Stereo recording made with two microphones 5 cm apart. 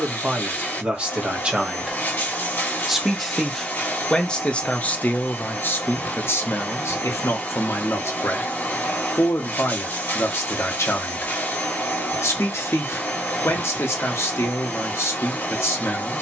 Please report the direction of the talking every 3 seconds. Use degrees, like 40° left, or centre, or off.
20° right, 20° left, 70° left, 70° left, 70° left, 70° left.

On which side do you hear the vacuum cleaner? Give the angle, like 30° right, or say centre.
40° left.